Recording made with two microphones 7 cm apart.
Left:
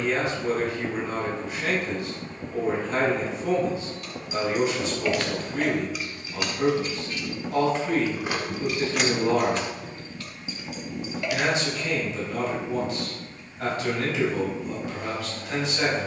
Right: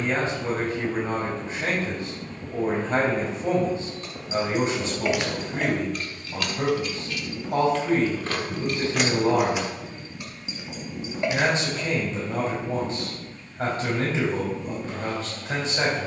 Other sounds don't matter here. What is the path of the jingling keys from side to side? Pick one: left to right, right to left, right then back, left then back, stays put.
left then back.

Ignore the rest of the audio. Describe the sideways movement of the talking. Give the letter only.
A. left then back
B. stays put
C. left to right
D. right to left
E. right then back
B.